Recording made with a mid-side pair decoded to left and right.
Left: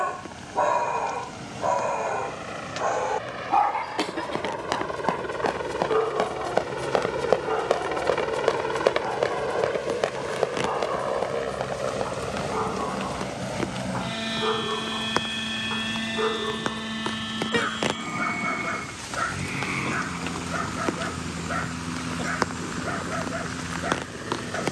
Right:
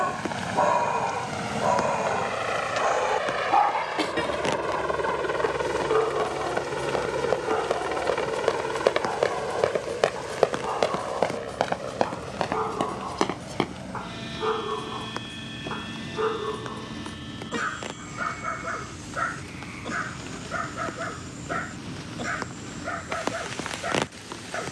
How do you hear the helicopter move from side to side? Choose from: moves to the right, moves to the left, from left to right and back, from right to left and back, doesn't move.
moves to the left.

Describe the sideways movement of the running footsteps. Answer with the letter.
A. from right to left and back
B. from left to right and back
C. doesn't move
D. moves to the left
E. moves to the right
E.